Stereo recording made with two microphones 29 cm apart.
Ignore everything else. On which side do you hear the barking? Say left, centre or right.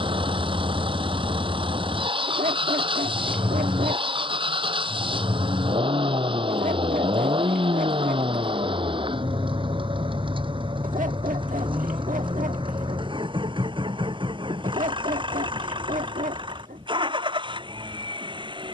right.